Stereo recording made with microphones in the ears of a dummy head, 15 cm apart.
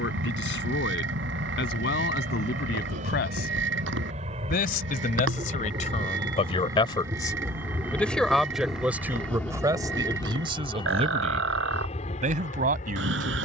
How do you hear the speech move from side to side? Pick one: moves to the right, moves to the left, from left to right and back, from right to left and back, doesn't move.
moves to the right.